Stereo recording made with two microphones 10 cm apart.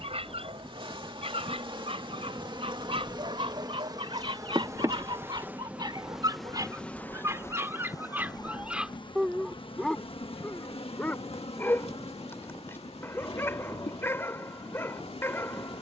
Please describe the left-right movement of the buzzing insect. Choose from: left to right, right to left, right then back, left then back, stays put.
right to left.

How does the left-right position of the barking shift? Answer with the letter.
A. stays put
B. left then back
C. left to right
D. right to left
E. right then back
D.